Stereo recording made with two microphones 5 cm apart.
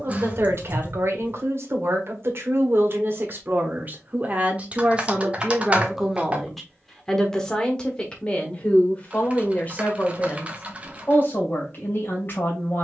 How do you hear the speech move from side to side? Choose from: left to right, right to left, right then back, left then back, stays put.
right to left.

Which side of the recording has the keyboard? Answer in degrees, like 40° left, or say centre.
30° right.